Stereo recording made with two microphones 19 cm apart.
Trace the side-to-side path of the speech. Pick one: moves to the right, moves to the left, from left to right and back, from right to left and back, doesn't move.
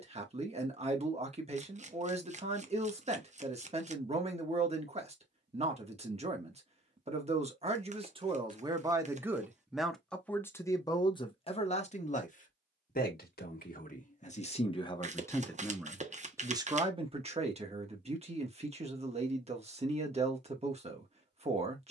from right to left and back.